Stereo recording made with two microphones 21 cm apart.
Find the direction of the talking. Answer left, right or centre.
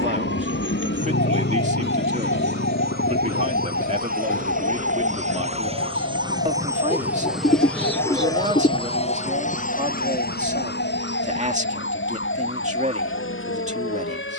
right.